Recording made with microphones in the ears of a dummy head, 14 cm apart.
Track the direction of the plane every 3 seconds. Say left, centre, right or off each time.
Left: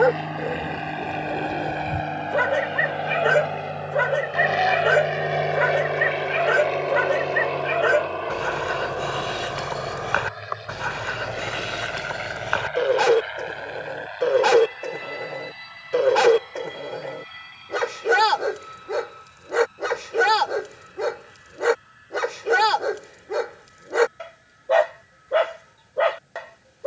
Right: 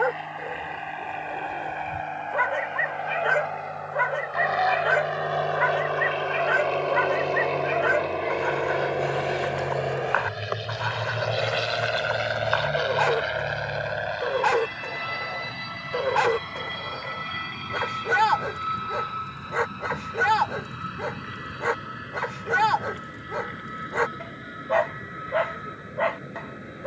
left, left, centre, right, right, right, right, right, right.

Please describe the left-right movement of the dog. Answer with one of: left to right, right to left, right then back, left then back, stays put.
stays put.